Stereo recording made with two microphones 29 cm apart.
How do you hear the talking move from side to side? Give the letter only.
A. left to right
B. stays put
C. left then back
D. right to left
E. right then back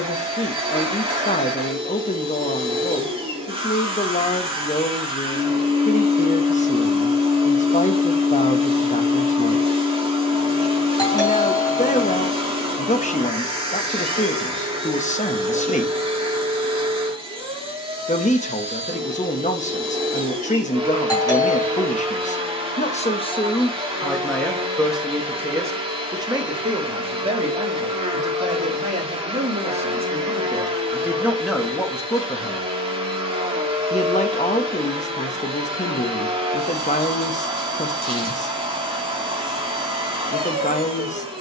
E.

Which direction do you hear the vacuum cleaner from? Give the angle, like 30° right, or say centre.
20° right.